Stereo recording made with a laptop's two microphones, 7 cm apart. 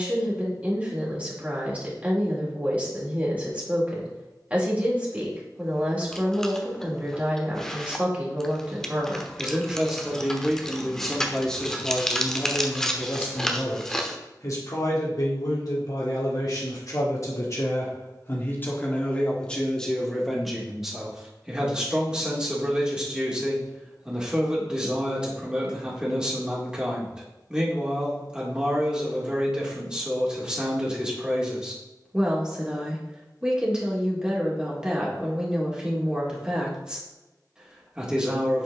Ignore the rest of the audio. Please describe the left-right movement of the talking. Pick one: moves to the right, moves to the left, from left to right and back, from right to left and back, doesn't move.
from right to left and back.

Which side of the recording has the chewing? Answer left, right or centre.
centre.